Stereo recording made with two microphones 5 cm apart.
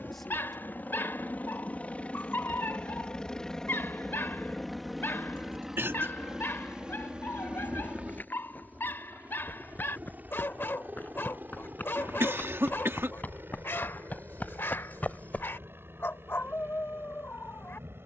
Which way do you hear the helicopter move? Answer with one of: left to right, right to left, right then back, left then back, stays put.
left to right.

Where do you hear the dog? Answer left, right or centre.
left.